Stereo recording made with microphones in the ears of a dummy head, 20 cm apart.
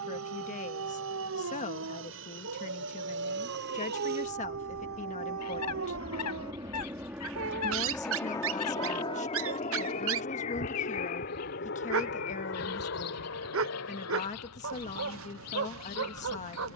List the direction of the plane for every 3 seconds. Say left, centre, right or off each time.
right, right, centre, left, left, left.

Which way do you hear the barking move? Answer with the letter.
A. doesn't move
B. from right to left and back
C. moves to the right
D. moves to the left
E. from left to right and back
A.